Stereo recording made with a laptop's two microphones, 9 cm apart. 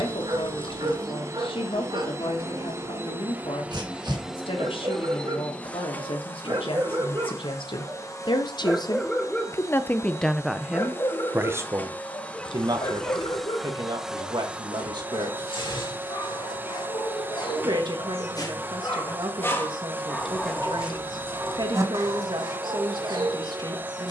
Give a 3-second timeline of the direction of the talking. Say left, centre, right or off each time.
left, left, left, centre, right, right, right, right.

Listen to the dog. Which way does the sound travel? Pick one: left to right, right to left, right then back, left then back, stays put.
left then back.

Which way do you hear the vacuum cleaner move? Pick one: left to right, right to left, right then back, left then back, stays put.
left then back.